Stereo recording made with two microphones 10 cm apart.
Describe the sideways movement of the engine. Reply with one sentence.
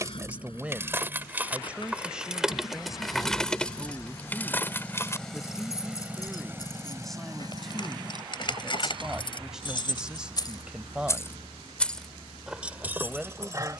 You can hear the engine go from the left side to the right.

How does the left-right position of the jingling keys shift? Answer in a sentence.
You can hear the jingling keys go left and come back.